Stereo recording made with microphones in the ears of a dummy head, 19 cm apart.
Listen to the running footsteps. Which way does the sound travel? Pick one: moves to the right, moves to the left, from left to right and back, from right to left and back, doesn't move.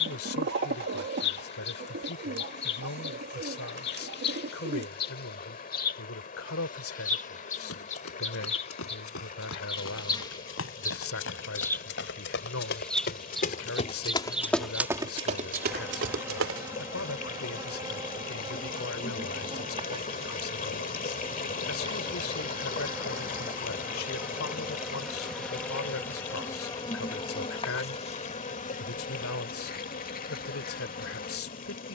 moves to the right.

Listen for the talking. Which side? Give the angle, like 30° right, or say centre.
70° left.